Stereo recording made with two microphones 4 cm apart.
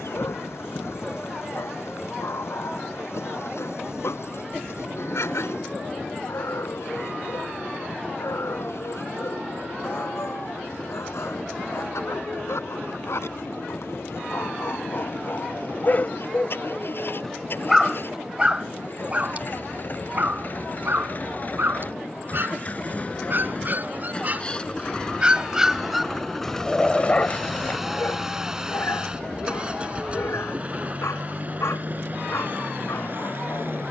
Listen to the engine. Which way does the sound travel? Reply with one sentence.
In this clip you hear the engine travel towards the right.